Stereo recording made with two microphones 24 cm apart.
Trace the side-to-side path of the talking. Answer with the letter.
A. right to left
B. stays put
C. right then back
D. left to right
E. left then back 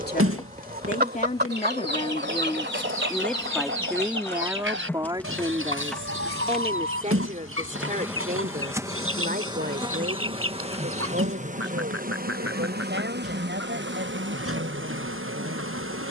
D.